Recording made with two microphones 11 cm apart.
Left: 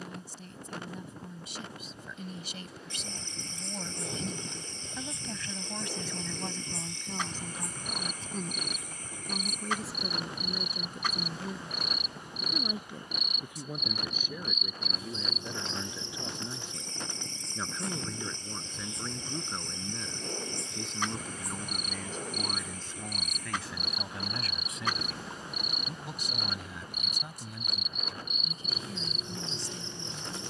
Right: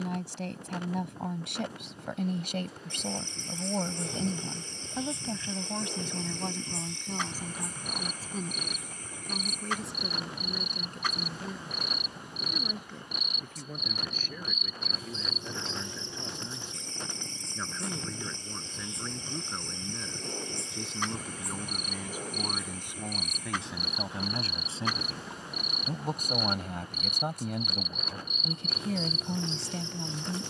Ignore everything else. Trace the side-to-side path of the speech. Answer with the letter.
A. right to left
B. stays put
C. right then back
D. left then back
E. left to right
D.